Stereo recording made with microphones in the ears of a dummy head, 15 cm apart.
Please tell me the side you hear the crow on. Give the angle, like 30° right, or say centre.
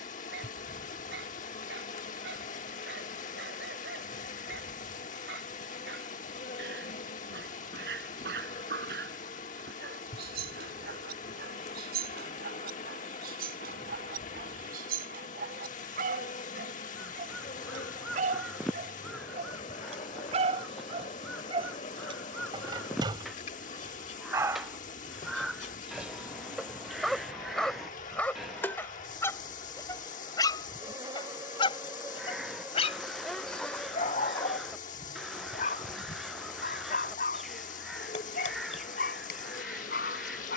centre.